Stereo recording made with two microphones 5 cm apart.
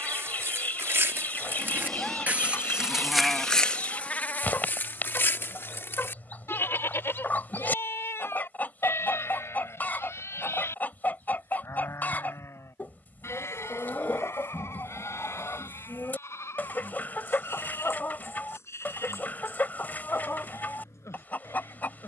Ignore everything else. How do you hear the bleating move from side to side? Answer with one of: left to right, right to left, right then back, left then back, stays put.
right to left.